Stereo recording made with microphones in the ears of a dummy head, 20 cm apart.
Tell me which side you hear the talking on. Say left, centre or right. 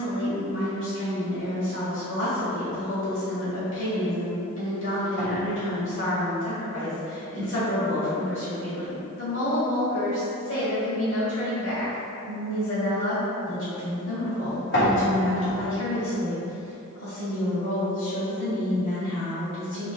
left.